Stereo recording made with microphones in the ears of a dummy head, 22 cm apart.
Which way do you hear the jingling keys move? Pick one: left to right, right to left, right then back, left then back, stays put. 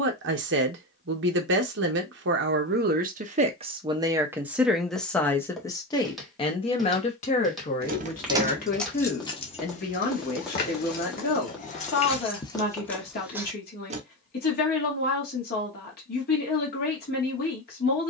left then back.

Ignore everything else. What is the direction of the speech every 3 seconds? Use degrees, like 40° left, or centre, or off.
50° right, 10° right, 30° left, 40° left, 40° left, 40° left.